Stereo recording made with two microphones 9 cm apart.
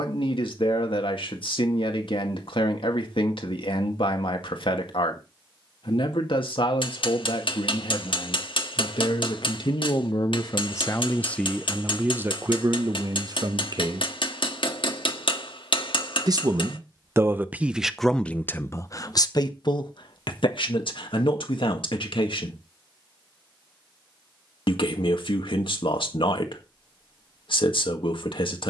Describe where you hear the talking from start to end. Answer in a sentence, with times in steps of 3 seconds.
In this clip you hear the talking on the left from 0 s, on the right from 12 s and on the left from 18 s.